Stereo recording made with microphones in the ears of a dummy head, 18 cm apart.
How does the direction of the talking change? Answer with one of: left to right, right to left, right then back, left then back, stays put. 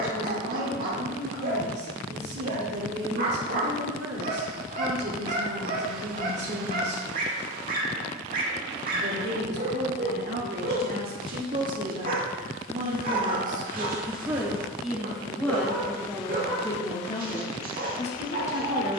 right to left.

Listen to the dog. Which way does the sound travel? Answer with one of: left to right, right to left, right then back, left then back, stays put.
stays put.